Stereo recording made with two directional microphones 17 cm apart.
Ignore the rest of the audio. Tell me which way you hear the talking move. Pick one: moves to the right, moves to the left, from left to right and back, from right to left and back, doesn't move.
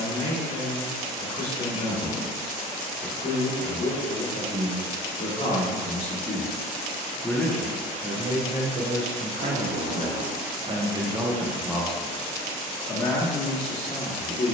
from left to right and back.